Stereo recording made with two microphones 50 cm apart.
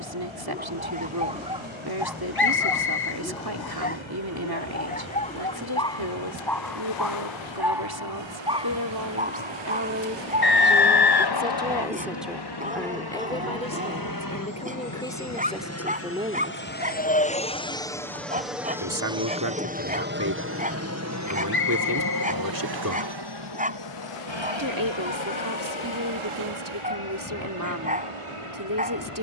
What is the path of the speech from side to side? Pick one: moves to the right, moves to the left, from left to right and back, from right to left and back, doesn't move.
from right to left and back.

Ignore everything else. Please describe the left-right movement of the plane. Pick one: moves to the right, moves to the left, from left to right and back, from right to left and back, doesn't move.
moves to the right.